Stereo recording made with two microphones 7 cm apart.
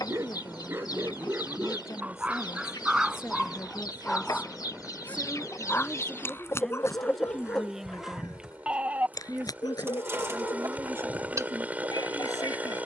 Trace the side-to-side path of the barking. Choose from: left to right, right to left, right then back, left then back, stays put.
right to left.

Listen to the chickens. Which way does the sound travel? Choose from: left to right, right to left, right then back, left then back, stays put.
left to right.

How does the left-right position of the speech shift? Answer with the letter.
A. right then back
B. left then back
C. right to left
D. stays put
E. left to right
E.